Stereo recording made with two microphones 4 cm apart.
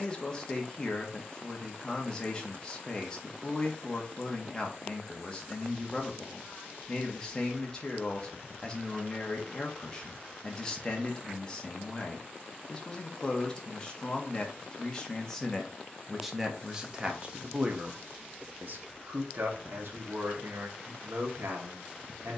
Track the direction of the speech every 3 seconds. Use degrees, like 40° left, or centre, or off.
20° left, 20° left, 20° left, 20° left, 20° left, 10° right, 60° right, 70° right.